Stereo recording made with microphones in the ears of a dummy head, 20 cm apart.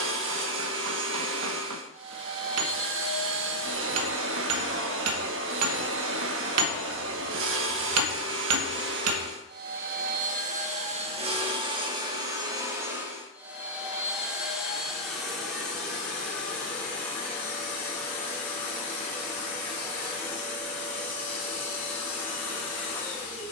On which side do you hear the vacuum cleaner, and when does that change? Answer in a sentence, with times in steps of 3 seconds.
In this clip you hear the vacuum cleaner on the right from 0 s and in the centre from 12 s.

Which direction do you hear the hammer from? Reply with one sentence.
You can hear the hammer on the right.